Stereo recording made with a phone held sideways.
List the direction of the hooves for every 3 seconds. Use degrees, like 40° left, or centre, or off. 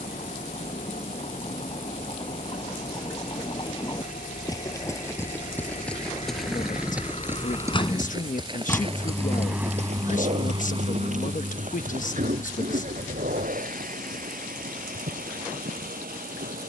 40° left, 20° left, 20° right, 60° right, 80° right, 80° right.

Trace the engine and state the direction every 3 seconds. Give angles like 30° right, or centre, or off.
70° left, 60° left, 40° left, 30° right, 70° right, 80° right.